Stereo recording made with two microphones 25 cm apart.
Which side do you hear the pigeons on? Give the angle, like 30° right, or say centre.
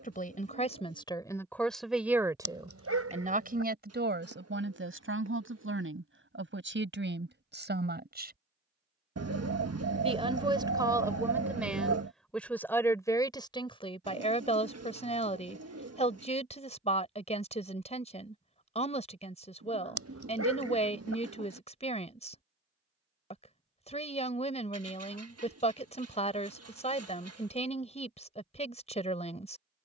70° right.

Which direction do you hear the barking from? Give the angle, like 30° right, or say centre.
70° right.